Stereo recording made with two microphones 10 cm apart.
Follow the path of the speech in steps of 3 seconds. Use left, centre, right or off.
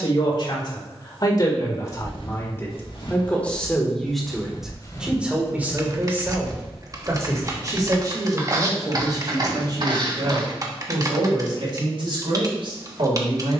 left, centre, right, right, right.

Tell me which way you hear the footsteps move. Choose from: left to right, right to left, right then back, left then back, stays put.
left to right.